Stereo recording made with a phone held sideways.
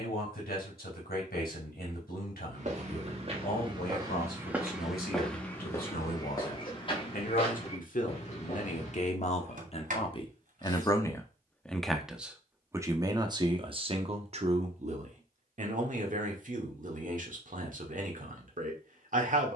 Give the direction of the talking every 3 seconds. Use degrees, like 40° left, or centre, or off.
80° left, 70° left, 60° left, 30° left, 30° right, 60° right, 60° right.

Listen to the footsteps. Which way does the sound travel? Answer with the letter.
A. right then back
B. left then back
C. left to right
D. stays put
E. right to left
E.